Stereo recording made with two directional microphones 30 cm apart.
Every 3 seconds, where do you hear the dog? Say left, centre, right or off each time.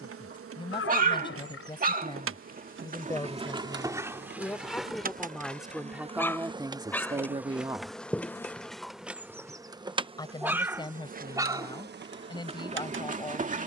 right, centre, centre, centre, right.